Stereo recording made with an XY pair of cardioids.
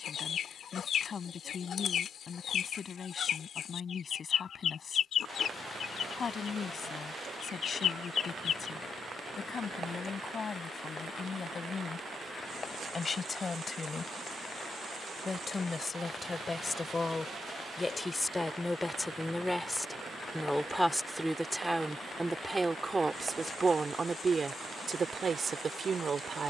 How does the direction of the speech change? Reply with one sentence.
In this clip you hear the speech move to the right.